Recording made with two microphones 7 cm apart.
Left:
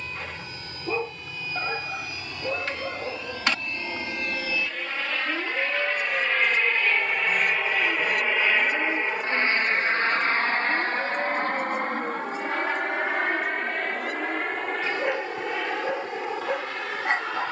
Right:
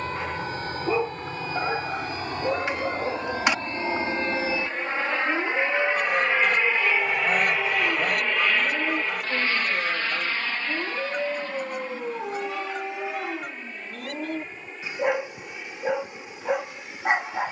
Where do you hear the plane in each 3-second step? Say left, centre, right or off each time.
right, right, centre, left, left, left.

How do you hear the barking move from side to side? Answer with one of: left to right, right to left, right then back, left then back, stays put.
stays put.